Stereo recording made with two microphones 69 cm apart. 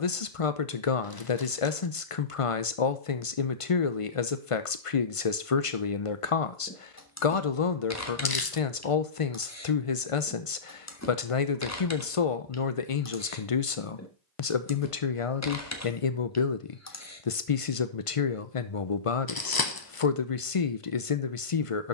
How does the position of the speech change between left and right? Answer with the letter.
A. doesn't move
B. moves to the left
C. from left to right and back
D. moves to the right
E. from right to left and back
A.